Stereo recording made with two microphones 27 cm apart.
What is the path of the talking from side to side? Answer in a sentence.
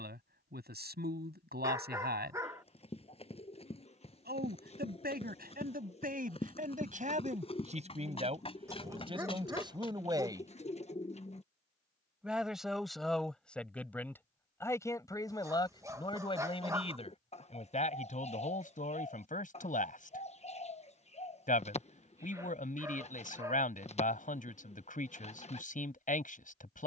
You can hear the talking move from right to left.